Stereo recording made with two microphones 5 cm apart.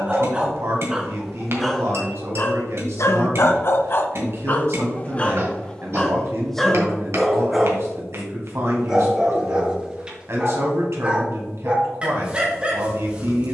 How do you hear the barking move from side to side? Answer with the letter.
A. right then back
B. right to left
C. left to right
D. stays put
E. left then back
E.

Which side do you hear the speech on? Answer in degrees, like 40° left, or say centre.
60° right.